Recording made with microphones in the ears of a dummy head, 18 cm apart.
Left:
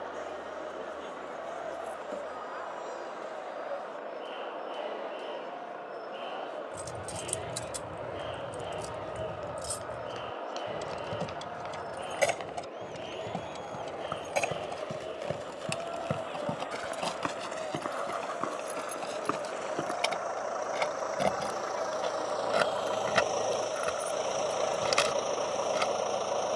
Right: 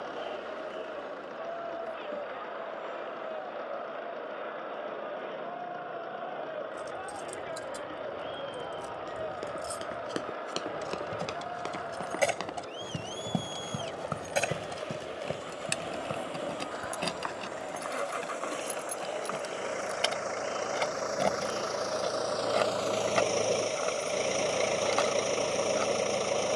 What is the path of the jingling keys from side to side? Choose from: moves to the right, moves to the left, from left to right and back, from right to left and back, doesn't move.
from left to right and back.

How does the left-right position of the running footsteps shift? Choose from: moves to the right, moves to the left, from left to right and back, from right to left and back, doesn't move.
moves to the left.